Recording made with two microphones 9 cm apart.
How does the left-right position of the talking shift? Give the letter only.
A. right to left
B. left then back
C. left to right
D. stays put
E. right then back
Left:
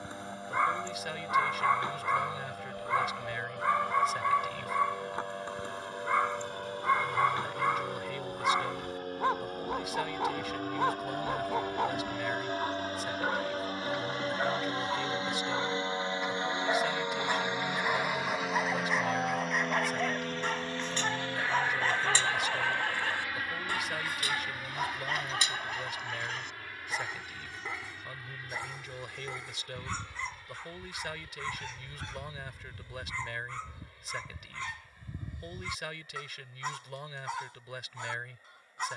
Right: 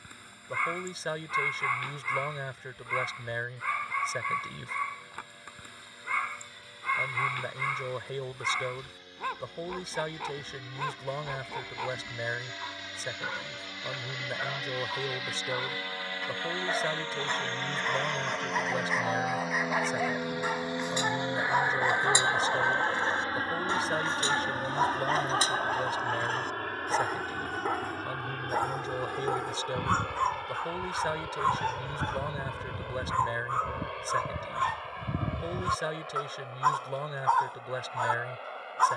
D.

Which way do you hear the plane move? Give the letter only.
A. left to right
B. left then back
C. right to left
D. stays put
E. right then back
A.